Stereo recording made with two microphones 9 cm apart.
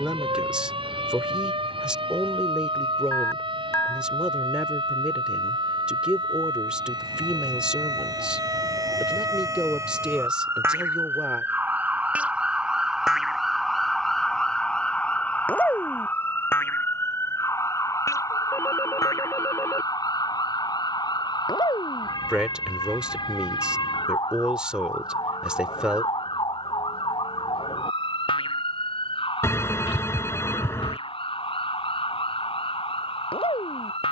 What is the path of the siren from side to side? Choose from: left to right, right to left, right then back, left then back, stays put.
right to left.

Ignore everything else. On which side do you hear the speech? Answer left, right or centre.
centre.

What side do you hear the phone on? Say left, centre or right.
left.